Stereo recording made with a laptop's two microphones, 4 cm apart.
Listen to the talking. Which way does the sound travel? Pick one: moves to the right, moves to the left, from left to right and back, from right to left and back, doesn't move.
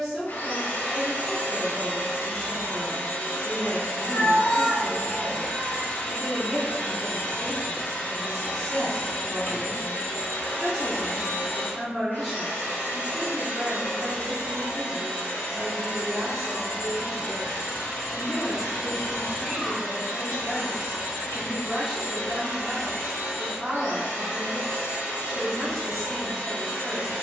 doesn't move.